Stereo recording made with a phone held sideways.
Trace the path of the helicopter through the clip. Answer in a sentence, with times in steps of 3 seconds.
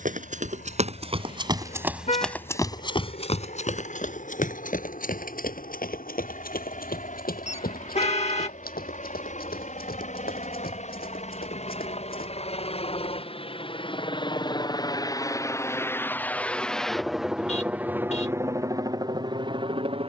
You can hear the helicopter on the left from 0 s, in the centre from 15 s and on the right from 18 s.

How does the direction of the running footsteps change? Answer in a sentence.
In this clip you hear the running footsteps move from right to left.